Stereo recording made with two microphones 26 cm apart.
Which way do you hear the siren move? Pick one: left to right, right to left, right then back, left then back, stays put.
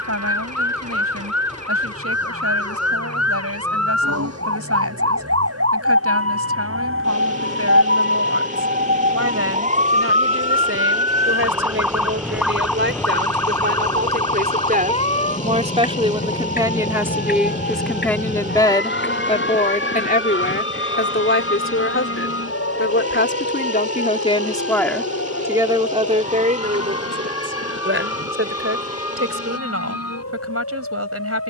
right to left.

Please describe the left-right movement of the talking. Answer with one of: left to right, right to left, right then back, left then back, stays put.
left then back.